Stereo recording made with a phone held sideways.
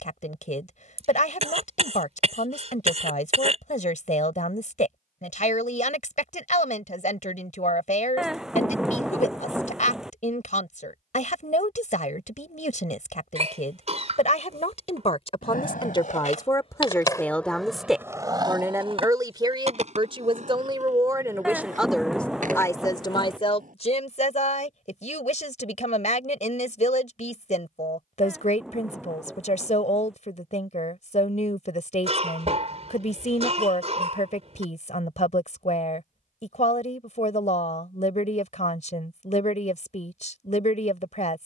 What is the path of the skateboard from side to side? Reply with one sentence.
You can hear the skateboard go from the left side to the right.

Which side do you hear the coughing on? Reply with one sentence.
In this clip you hear the coughing on the right.